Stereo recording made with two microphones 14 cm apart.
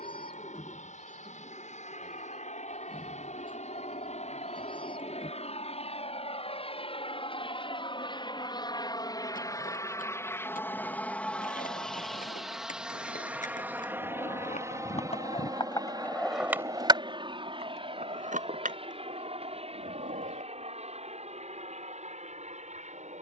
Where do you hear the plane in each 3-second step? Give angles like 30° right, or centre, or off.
70° left, 60° left, 40° left, 20° left, 10° right, 30° right, 40° right, 50° right.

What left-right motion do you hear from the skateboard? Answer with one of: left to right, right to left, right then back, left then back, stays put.
left to right.